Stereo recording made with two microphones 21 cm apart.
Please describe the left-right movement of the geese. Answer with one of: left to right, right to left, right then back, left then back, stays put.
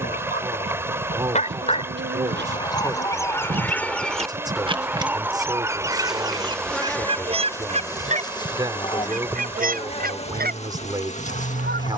left to right.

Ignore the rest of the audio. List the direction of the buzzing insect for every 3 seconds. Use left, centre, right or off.
right, right, centre, left.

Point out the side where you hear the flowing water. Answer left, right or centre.
centre.